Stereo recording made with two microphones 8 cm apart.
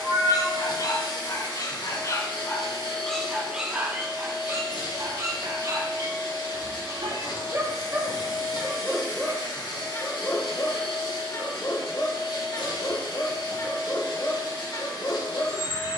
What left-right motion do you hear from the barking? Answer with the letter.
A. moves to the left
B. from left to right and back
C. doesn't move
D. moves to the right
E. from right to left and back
B.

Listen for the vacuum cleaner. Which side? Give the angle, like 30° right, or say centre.
70° left.